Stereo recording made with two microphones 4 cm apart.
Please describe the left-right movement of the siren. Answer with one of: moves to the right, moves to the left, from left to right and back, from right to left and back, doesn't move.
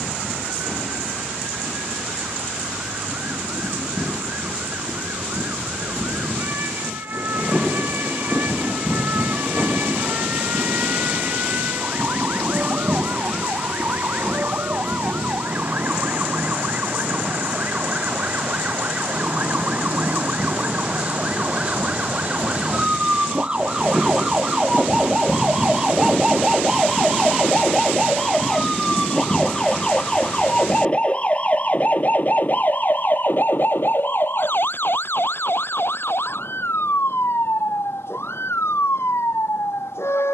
moves to the left.